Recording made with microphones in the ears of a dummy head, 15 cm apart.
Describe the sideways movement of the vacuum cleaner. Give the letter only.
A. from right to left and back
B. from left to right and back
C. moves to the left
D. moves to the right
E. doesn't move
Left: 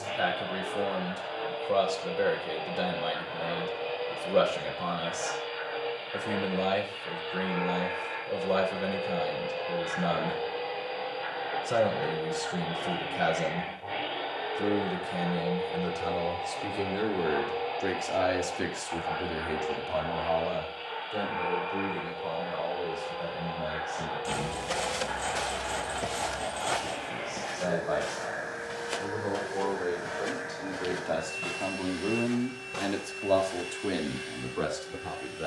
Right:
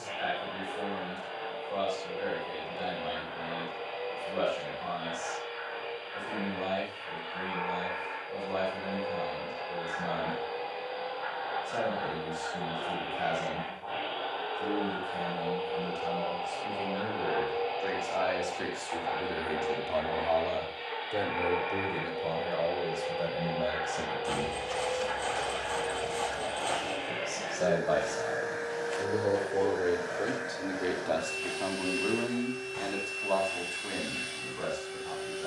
D.